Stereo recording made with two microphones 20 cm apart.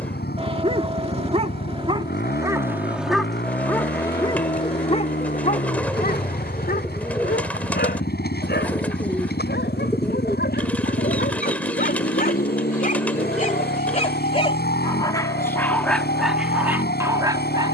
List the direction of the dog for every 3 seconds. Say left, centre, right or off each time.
right, left, left, left, left, centre.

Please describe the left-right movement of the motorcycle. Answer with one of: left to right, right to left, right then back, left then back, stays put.
stays put.